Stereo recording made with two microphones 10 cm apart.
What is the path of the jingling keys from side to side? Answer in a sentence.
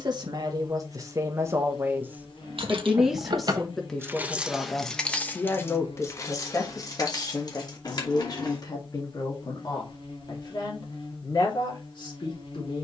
You can hear the jingling keys go from the right side to the left.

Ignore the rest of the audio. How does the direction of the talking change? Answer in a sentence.
You can hear the talking move from right to left.